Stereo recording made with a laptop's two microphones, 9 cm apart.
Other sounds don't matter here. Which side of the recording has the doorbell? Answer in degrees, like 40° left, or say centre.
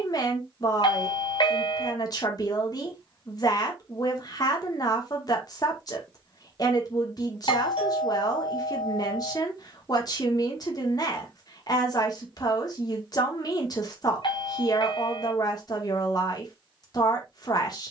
60° left.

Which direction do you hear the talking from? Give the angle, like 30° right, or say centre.
40° left.